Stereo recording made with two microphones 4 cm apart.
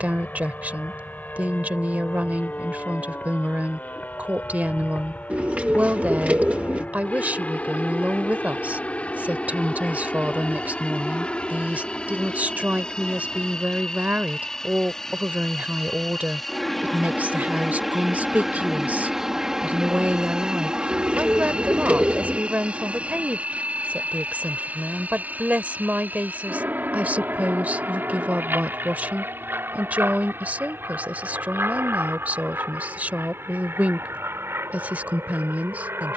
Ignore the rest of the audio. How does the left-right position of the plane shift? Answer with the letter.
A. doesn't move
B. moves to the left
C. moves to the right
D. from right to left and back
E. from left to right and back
C.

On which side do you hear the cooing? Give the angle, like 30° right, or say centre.
40° right.